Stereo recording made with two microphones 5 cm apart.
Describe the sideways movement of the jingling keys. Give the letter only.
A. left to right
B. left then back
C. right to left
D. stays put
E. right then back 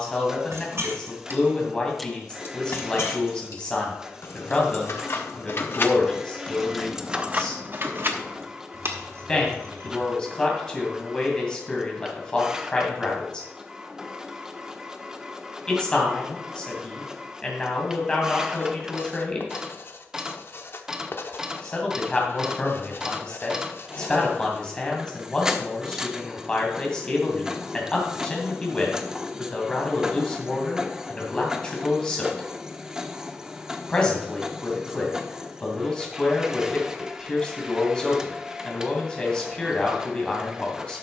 B.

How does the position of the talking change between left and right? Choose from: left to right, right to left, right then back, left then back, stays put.
stays put.